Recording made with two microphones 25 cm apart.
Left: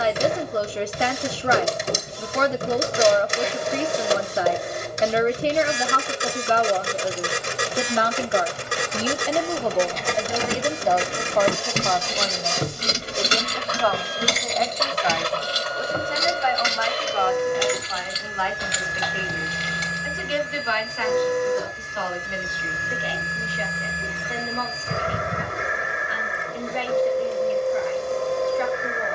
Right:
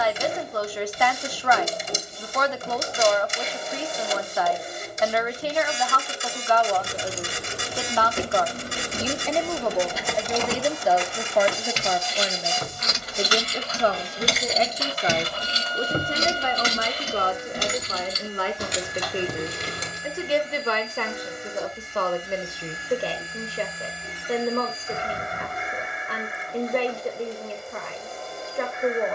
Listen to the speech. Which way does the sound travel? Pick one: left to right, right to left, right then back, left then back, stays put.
left to right.